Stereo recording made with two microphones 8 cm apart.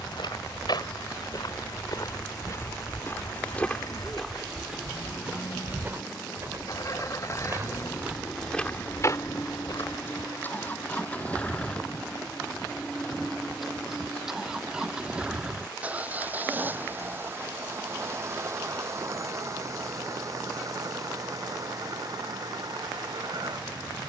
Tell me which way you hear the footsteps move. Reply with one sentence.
You can hear the footsteps go right and come back.